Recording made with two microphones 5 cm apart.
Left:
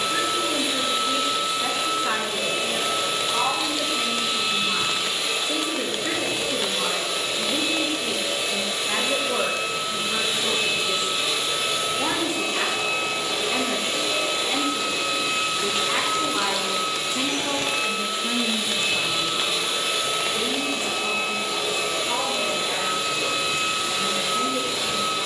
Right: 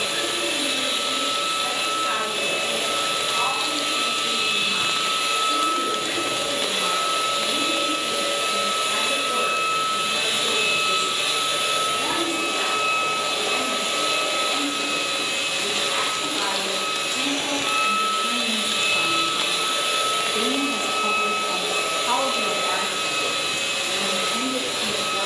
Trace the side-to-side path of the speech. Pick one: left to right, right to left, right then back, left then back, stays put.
left to right.